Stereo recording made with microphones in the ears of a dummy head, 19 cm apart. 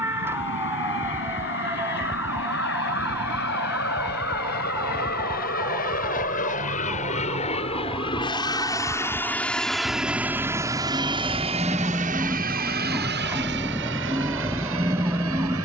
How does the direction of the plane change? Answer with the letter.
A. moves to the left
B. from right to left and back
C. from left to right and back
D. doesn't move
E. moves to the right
E.